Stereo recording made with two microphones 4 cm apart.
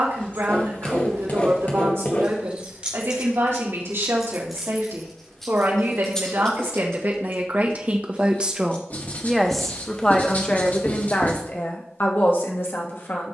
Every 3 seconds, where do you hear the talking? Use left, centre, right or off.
right, right, right, left, left.